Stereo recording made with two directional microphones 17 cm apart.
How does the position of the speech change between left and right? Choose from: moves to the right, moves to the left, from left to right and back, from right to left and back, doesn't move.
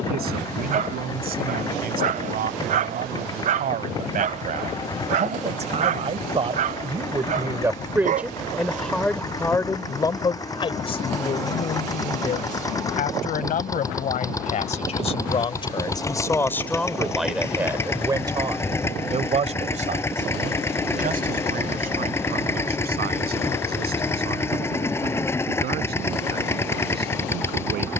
from right to left and back.